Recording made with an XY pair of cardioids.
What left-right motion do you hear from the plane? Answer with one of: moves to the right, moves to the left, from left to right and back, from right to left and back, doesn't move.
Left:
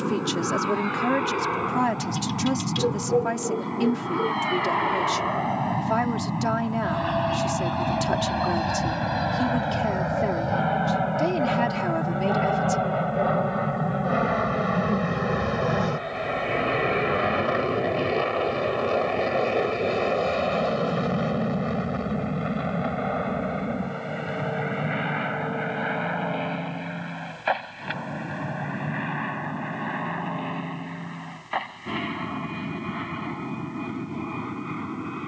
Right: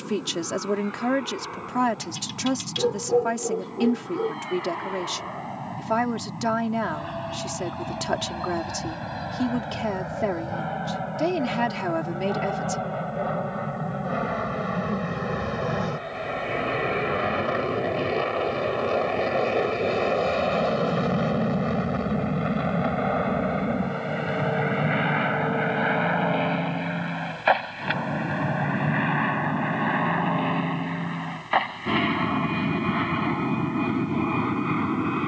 moves to the right.